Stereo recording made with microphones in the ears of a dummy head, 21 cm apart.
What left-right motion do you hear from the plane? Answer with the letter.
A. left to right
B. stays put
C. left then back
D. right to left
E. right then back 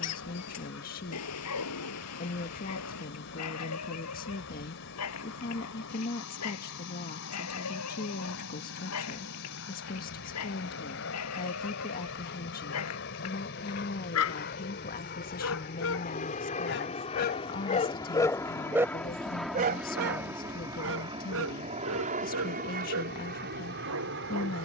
A.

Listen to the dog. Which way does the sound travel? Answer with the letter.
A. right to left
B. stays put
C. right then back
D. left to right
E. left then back
D.